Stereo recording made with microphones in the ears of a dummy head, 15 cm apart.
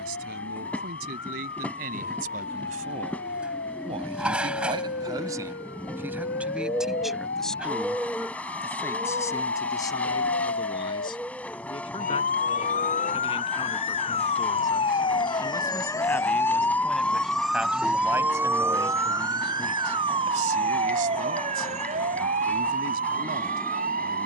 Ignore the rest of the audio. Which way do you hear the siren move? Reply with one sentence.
You can hear the siren move to the right.